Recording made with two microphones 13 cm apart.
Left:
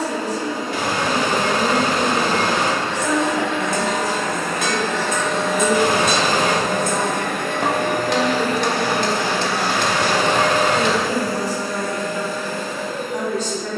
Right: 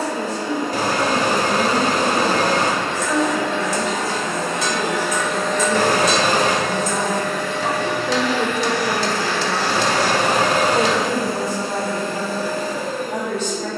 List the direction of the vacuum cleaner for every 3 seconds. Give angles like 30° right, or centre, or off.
40° right, 20° right, 50° left, 10° right, 40° right.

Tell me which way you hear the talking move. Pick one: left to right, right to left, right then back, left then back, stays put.
left to right.